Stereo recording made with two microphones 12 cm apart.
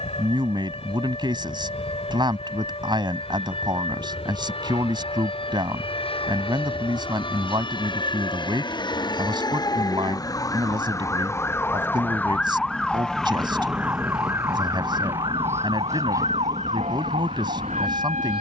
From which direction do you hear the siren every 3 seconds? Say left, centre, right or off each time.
left, left, left, left, centre, right.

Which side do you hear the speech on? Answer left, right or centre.
right.